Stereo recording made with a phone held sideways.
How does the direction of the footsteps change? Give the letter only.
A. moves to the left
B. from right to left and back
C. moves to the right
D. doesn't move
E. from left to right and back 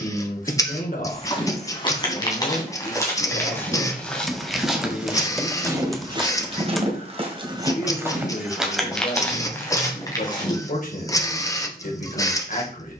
E.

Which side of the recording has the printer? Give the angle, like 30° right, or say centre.
20° left.